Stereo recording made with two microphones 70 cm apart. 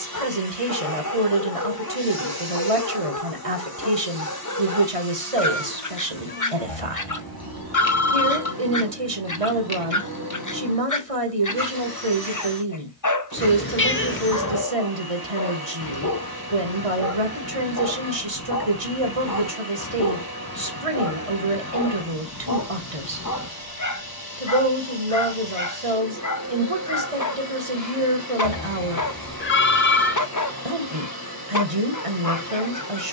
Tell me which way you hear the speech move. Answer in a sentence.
You can hear the speech stay in one place.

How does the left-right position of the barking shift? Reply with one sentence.
In this clip you hear the barking stay put.